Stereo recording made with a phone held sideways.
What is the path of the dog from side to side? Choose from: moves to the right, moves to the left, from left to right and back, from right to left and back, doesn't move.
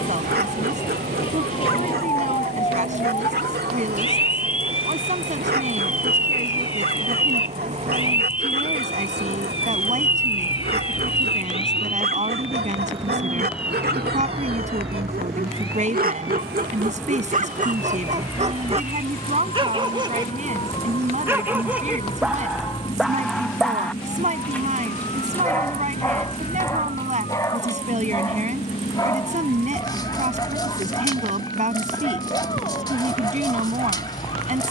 moves to the left.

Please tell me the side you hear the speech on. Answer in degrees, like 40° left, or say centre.
50° right.